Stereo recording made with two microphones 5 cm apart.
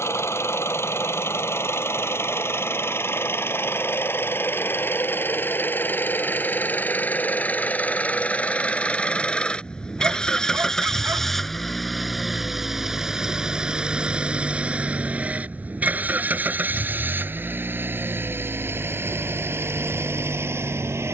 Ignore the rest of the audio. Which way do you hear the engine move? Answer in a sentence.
In this clip you hear the engine move to the right.